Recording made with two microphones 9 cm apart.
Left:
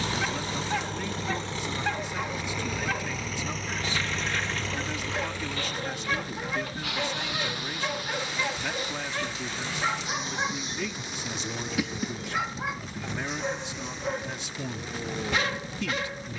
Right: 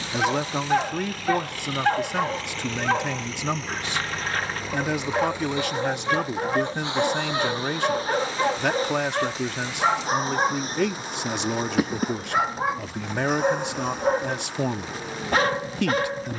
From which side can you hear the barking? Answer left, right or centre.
right.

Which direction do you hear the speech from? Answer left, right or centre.
right.